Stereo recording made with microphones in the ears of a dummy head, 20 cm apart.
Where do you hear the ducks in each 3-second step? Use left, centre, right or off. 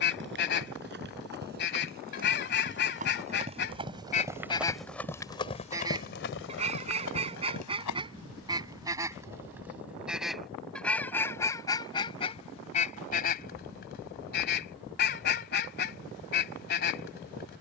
left, left, right, centre, left, left.